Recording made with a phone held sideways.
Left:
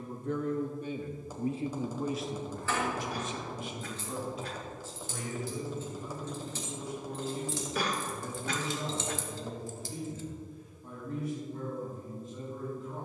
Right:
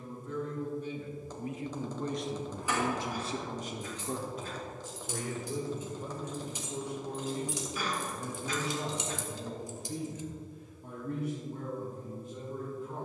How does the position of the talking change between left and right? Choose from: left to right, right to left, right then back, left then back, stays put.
left to right.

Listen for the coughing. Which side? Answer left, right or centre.
left.